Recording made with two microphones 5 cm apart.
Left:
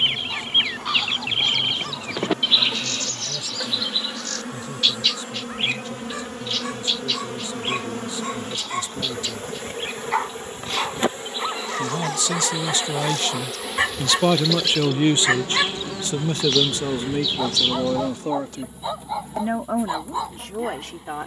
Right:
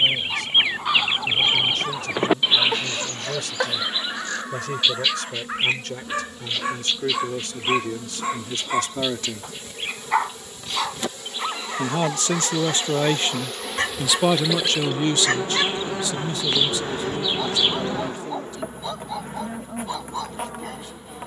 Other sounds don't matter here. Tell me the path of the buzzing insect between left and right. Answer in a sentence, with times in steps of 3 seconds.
In this clip you hear the buzzing insect on the left from 0 s, in the centre from 12 s and on the right from 15 s.